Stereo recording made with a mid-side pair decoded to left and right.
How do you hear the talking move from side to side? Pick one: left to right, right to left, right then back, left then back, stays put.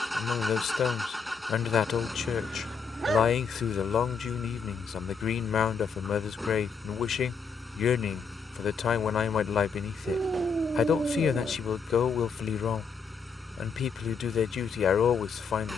stays put.